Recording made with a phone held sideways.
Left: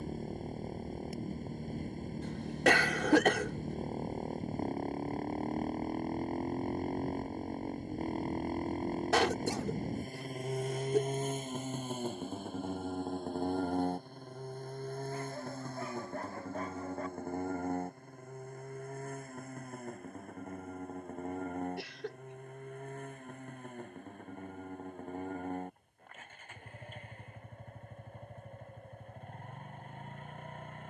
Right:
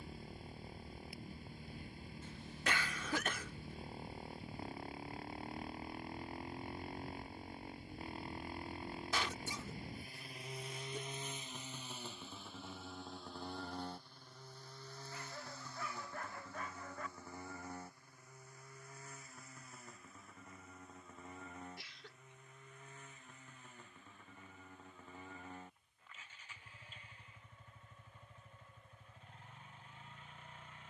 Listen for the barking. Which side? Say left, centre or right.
left.